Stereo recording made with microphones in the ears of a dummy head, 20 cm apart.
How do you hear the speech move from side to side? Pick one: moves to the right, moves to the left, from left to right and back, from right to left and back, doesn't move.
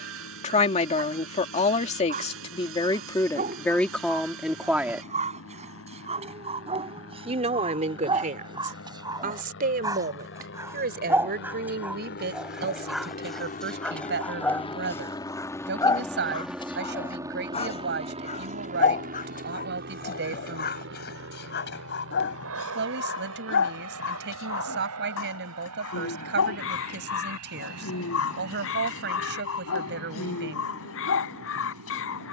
moves to the right.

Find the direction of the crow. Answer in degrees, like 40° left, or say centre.
60° left.